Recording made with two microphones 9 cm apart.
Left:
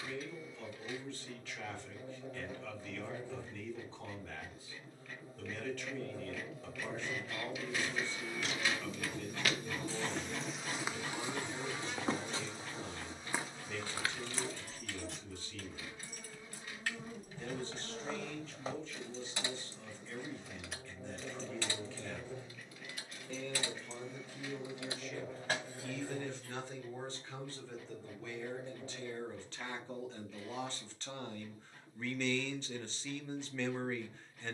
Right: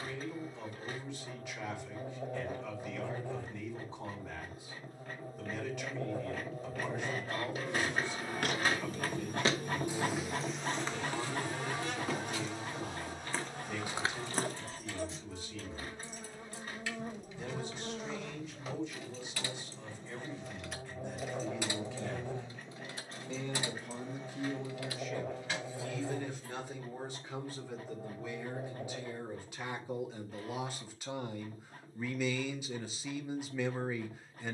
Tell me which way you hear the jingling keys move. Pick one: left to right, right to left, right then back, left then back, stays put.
right then back.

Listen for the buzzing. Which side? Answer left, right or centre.
right.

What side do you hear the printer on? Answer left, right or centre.
right.